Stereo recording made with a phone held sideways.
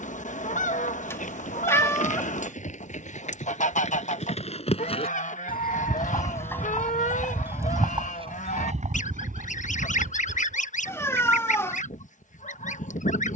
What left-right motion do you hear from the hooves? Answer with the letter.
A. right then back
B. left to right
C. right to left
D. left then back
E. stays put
B.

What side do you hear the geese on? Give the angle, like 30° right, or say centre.
60° left.